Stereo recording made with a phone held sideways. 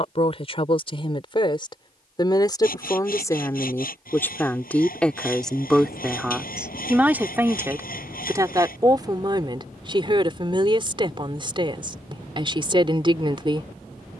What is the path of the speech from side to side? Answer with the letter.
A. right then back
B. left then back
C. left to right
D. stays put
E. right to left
C.